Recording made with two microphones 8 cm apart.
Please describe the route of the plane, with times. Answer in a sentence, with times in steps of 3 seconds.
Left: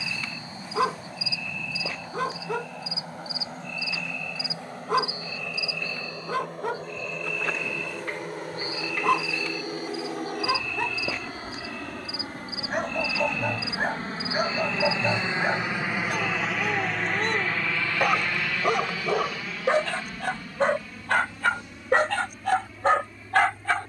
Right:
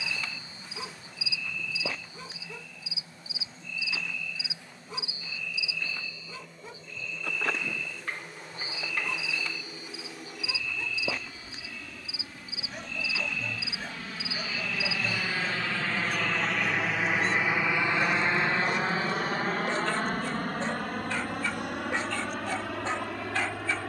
In this clip you hear the plane on the left from 0 s, in the centre from 15 s and on the right from 18 s.